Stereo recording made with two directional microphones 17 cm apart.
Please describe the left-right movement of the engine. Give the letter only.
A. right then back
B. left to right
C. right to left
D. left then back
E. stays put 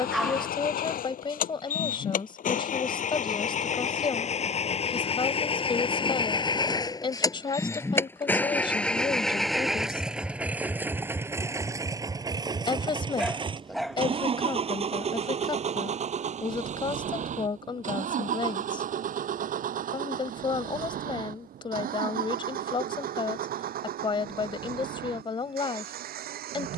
B.